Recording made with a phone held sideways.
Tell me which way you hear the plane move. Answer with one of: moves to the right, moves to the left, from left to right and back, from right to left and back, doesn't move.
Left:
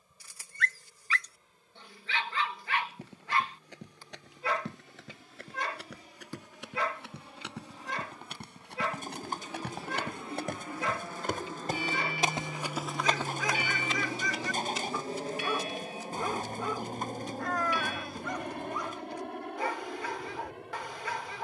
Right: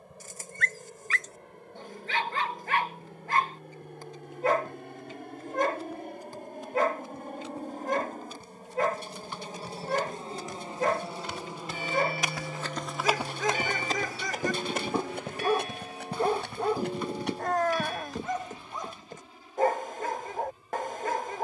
moves to the left.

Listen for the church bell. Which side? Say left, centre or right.
right.